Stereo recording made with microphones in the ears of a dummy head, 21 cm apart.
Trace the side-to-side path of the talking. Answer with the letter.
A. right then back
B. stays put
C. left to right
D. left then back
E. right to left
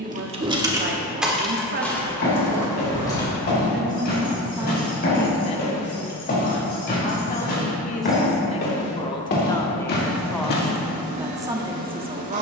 D.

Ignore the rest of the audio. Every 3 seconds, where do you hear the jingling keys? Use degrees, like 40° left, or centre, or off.
centre, 20° left, 20° left, off.